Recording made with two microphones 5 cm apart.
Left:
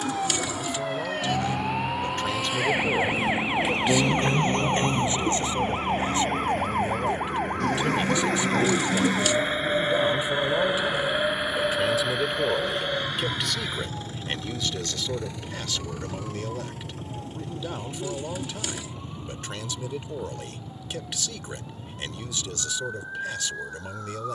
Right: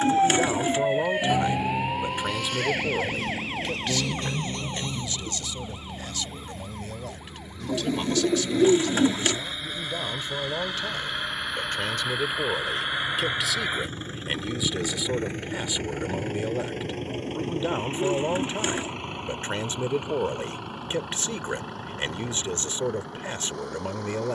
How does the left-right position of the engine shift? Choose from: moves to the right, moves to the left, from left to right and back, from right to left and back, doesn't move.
moves to the right.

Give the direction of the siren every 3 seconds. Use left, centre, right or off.
centre, left, left, left, left, left, left, left.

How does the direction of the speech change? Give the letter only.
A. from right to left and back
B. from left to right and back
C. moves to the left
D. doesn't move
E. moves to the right
A.